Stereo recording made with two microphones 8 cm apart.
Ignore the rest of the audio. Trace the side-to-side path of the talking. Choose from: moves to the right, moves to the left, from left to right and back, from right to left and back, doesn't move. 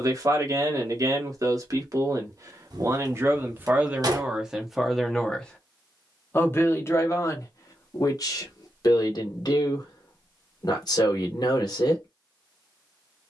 moves to the left.